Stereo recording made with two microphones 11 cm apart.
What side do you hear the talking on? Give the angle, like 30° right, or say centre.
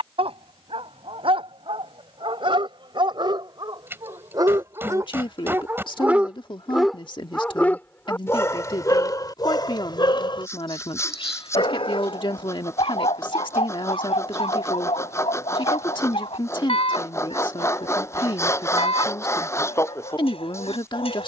50° left.